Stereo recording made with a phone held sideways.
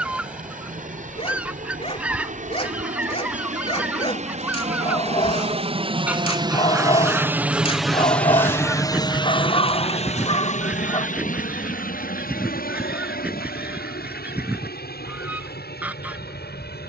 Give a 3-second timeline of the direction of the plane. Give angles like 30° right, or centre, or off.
70° right, 50° right, 10° right, 50° left, 70° left, 70° left.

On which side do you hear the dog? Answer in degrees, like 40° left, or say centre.
40° left.